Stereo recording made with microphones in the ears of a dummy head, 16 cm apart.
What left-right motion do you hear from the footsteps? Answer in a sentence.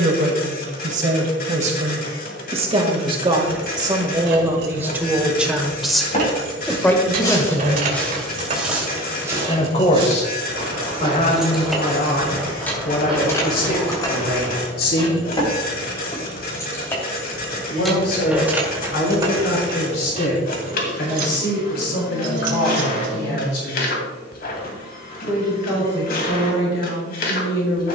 You can hear the footsteps go right and come back.